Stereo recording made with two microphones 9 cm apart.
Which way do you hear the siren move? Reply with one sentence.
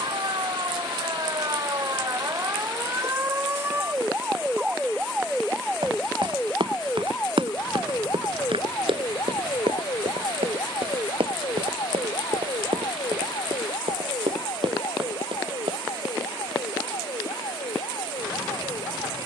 You can hear the siren go from the right side to the left.